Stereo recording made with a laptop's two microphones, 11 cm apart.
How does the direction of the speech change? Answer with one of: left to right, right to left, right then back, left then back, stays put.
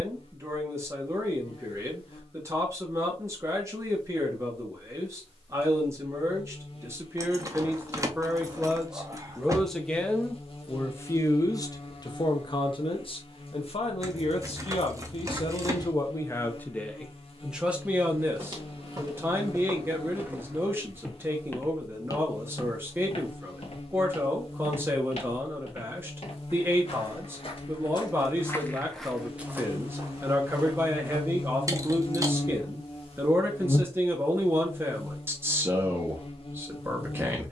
left then back.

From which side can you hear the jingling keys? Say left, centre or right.
right.